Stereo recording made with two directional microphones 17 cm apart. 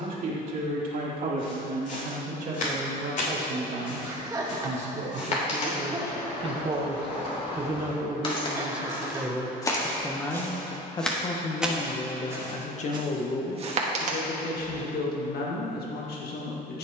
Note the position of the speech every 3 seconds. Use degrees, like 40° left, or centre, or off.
50° right, 40° right, 20° right, 20° left, 50° left, 60° left.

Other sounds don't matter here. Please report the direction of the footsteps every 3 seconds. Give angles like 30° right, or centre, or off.
50° left, 50° left, 40° left, 10° left, 30° right, off.